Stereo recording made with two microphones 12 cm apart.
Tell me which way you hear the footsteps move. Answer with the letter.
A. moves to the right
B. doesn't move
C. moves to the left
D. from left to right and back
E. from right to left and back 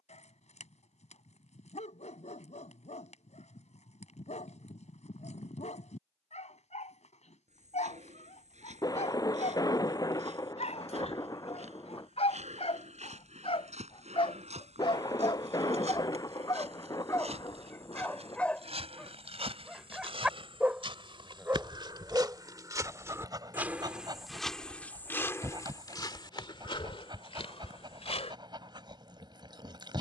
C.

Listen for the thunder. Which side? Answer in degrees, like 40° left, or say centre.
30° left.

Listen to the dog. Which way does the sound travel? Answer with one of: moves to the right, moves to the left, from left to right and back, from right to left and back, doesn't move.
moves to the right.